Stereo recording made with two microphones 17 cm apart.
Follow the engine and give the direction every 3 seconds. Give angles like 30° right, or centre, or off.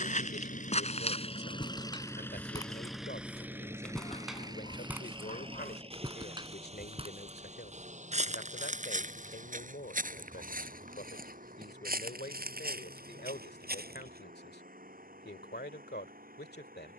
30° left, 20° right, 40° right, 50° right, 50° right, 60° right.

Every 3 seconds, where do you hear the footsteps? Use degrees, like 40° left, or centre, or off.
30° left, 10° right, 40° right, 50° right, 60° right, off.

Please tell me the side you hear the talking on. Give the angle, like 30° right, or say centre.
70° left.